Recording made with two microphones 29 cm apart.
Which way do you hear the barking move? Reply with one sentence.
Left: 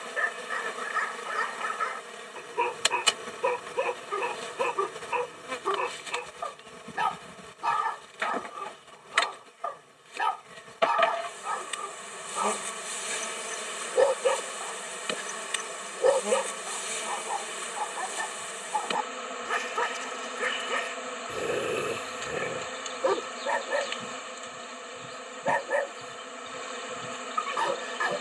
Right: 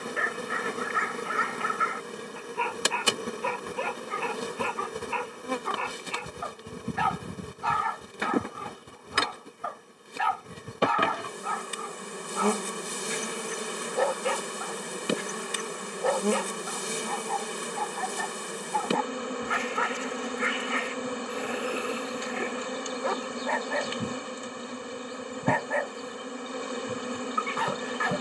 You can hear the barking stay put.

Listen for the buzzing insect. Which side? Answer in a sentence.
You can hear the buzzing insect on the right.